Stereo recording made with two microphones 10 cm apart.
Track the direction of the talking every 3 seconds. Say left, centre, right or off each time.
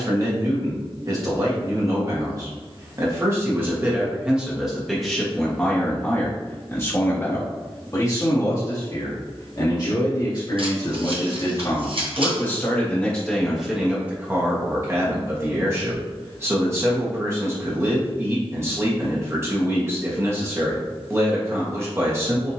right, centre, left, left, centre, right, right, right.